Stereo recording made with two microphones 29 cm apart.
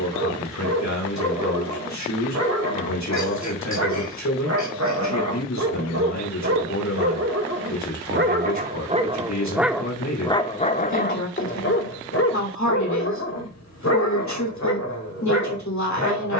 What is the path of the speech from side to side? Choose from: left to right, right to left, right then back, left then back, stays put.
stays put.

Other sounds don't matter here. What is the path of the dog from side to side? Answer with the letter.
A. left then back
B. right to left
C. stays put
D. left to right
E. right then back
B.